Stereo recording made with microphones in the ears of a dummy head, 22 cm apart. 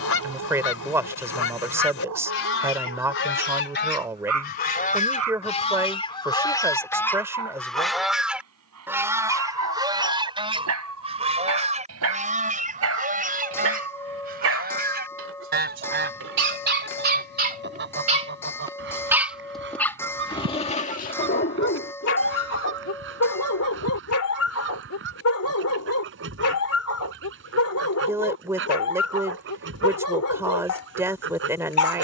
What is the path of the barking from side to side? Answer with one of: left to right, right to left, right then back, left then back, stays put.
right to left.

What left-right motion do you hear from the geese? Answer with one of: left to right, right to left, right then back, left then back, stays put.
left to right.